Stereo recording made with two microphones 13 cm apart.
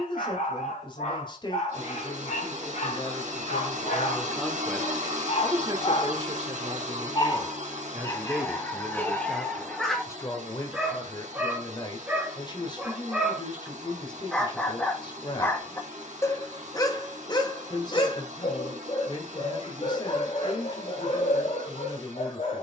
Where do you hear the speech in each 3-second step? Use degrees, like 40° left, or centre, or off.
40° left, 10° left, 30° right, 30° left, 40° left, 40° left, 40° left, 40° left.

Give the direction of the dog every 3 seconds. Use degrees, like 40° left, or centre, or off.
70° left, 60° left, 30° left, centre, centre, 30° left, 50° left, 60° left.